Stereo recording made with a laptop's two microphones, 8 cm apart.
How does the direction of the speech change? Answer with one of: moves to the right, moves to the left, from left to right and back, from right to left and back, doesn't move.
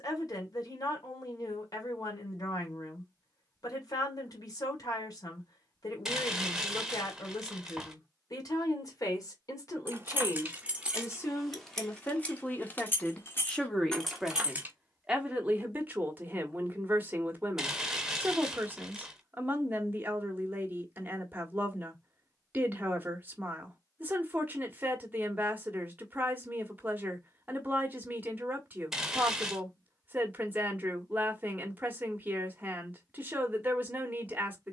moves to the right.